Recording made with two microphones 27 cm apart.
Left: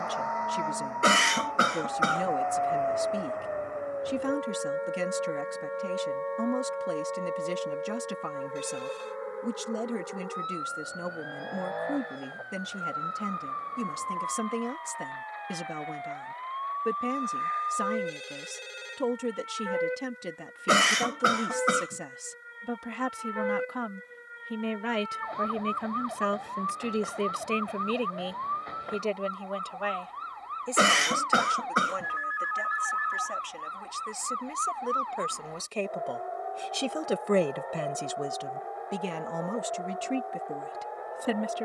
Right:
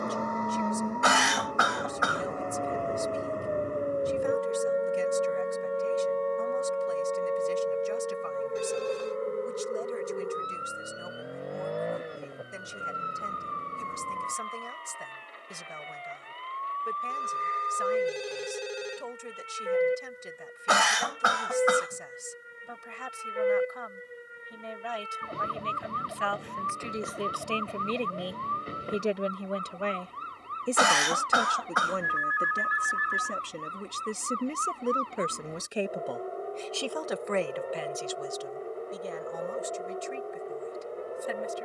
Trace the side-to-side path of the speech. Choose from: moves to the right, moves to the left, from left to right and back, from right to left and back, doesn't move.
from left to right and back.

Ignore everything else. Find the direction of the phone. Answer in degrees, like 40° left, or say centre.
60° right.